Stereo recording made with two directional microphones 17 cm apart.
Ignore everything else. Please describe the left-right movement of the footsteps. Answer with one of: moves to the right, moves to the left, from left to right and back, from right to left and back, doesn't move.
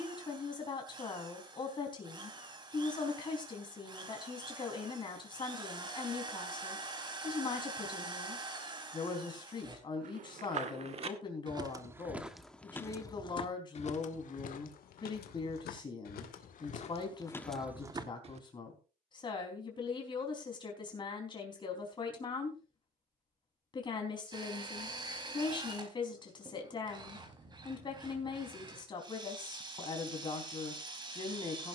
from right to left and back.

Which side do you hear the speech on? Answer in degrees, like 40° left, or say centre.
30° left.